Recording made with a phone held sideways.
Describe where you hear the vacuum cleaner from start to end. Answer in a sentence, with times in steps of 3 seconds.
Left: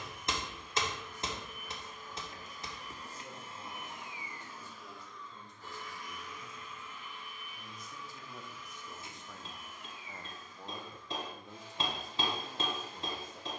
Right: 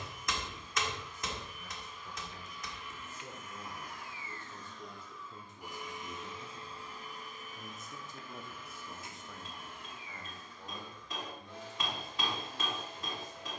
In this clip you hear the vacuum cleaner on the left from 0 s, in the centre from 3 s and on the right from 6 s.